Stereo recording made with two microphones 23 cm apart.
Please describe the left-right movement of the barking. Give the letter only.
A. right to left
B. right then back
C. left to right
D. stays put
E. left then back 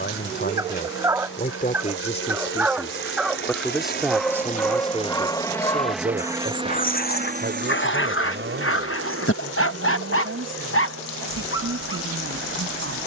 A.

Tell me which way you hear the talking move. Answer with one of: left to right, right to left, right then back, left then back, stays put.
left to right.